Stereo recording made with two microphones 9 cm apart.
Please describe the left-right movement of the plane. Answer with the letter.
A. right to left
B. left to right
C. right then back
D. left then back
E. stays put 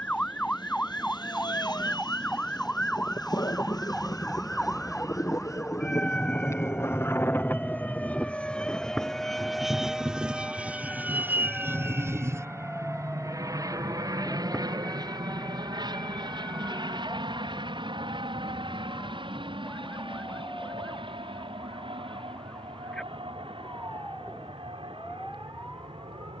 B.